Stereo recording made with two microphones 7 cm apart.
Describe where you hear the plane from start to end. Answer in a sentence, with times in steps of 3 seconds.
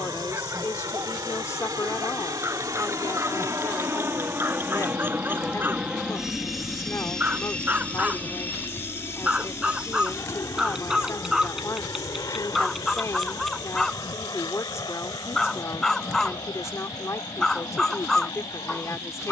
You can hear the plane on the right from 0 s, in the centre from 6 s and on the left from 9 s.